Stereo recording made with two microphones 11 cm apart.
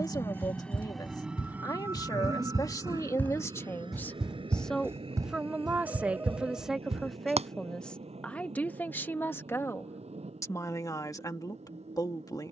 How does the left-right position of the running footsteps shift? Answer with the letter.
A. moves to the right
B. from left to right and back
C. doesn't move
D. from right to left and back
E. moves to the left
A.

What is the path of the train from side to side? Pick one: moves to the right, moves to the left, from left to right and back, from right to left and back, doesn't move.
moves to the right.